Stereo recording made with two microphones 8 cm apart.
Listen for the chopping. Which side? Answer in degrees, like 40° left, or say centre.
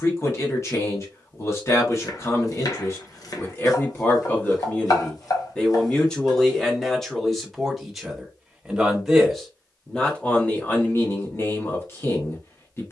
50° left.